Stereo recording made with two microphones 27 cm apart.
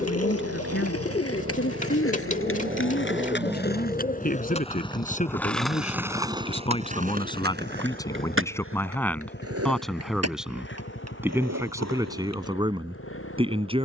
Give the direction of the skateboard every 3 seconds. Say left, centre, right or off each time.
left, left, right, right, right.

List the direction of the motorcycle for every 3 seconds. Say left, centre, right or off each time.
right, centre, left, left, left.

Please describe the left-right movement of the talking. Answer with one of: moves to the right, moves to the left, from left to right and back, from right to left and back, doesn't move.
moves to the right.